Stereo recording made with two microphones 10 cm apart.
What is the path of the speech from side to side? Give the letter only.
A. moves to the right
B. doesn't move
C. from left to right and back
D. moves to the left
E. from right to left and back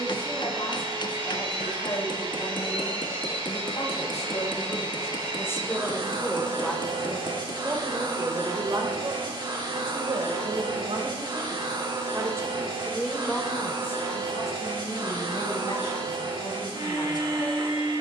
C.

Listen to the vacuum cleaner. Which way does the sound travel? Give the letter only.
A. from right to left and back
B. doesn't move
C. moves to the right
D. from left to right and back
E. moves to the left
B.